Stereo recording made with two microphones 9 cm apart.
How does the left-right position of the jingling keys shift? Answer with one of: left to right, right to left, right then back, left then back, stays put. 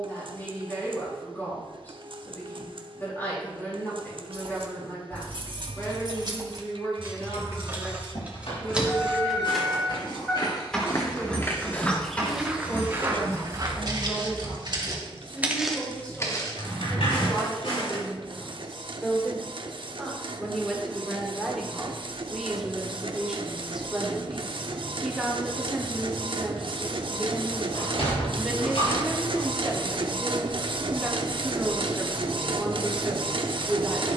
right to left.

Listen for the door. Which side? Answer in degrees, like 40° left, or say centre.
80° left.